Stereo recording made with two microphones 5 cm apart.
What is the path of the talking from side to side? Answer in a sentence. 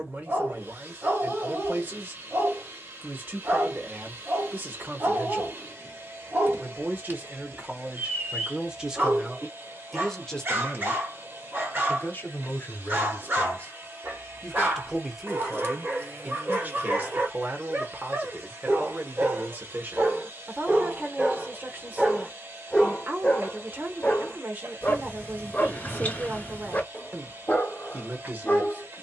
You can hear the talking go left and come back.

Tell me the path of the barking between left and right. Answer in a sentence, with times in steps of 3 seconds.
You can hear the barking on the right from 0 s, in the centre from 21 s and on the left from 24 s.